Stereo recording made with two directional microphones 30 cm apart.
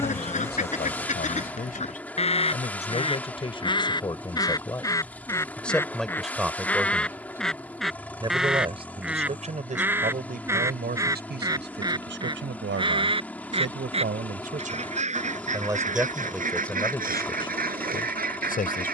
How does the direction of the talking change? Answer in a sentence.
You can hear the talking go right and come back.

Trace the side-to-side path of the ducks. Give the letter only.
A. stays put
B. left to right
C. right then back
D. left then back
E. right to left
B.